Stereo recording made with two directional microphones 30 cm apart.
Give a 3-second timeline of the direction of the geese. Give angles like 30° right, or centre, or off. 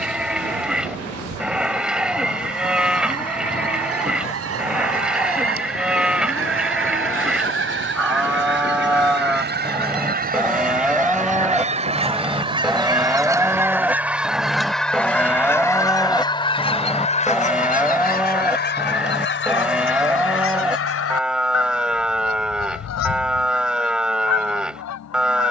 50° right, 50° right, 40° right, 30° right, 10° right, 20° left, 40° left, 60° left, 60° left.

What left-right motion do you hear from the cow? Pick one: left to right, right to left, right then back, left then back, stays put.
stays put.